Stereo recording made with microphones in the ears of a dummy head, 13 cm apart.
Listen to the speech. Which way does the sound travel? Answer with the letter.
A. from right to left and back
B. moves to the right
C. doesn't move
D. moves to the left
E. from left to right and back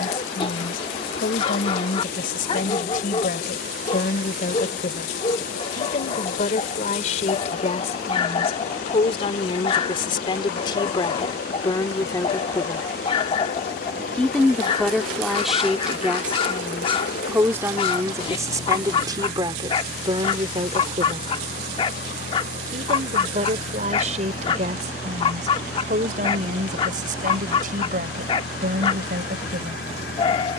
B.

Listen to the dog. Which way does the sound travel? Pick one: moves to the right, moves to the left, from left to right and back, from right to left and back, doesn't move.
doesn't move.